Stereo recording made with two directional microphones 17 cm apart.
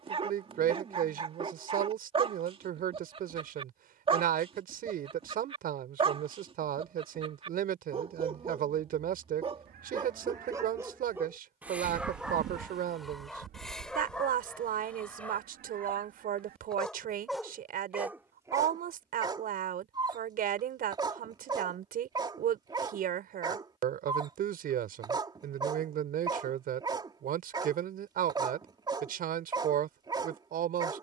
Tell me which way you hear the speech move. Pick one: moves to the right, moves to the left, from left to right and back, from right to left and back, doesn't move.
doesn't move.